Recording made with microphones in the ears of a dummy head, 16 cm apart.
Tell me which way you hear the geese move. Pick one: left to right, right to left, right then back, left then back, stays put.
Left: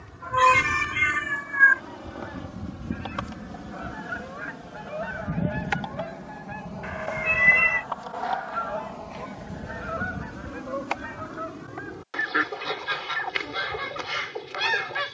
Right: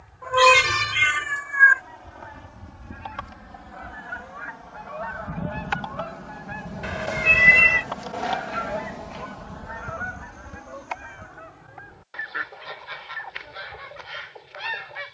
right then back.